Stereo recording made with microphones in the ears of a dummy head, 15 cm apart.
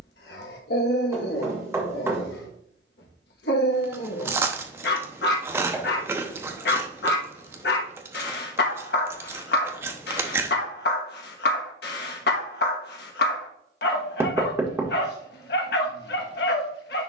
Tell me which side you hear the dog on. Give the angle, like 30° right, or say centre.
70° left.